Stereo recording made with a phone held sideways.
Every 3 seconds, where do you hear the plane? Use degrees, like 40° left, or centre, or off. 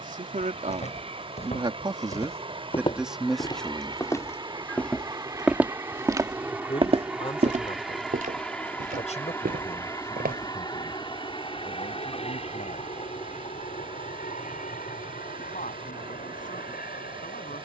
40° right, 30° right, centre, 20° left, 50° left, 60° left.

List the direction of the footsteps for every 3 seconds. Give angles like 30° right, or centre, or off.
40° left, 10° left, 50° right, 80° right, off, off.